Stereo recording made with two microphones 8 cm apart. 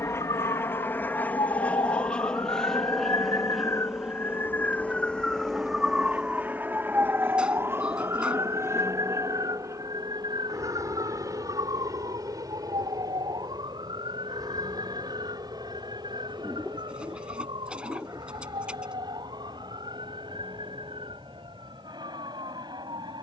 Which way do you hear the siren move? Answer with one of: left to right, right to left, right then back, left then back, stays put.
left to right.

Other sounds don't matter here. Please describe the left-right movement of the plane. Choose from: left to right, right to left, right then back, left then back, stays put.
left to right.